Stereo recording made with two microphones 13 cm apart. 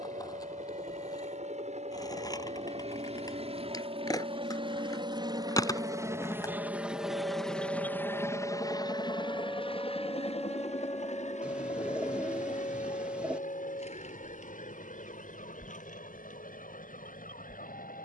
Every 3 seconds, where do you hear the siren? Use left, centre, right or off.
right, right, right, centre, left, left.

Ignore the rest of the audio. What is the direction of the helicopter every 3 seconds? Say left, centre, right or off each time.
right, right, centre, left, left, left.